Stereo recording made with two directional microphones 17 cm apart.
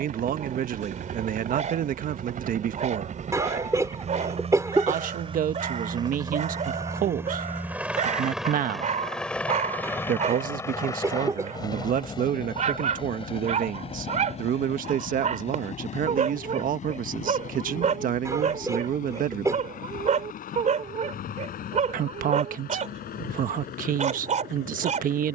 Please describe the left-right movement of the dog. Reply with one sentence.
In this clip you hear the dog stay in one place.